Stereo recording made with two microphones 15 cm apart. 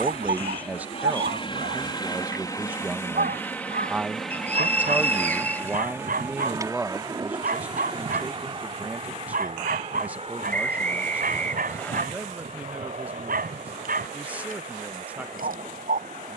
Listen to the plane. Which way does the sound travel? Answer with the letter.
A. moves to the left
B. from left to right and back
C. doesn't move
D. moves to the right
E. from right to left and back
D.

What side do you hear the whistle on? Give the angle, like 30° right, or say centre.
10° left.